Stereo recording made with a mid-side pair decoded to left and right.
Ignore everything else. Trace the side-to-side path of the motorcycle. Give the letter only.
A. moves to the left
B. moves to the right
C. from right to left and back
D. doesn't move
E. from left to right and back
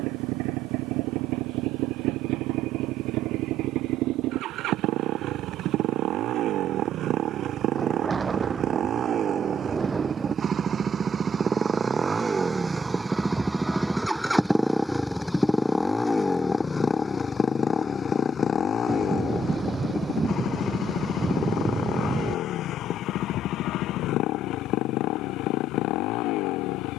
A.